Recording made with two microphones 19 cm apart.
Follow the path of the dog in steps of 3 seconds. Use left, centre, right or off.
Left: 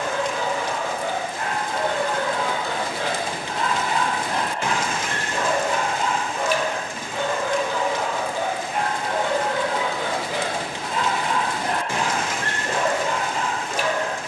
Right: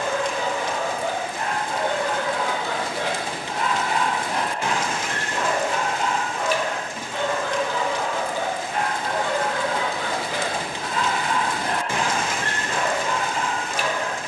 right, centre, centre, left, left.